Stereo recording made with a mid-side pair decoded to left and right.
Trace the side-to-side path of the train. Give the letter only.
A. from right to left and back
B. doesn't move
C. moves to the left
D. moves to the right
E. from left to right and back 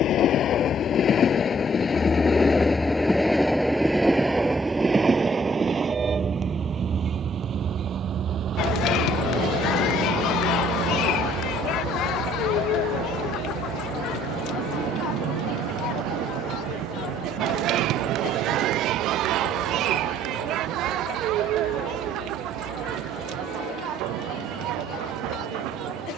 D.